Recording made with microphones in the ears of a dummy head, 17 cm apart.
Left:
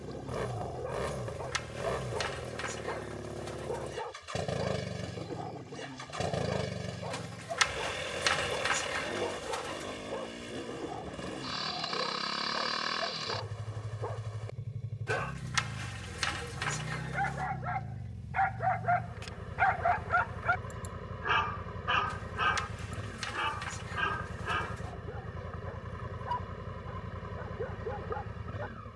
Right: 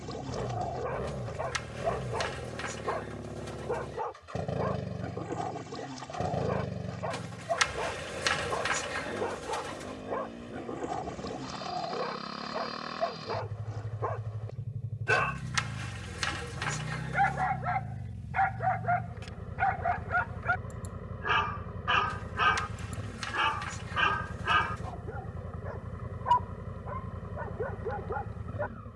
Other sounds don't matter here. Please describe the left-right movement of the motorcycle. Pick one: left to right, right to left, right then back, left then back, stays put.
stays put.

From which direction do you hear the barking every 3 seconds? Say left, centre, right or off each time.
right, right, right, right, right, right, left, centre, right, right.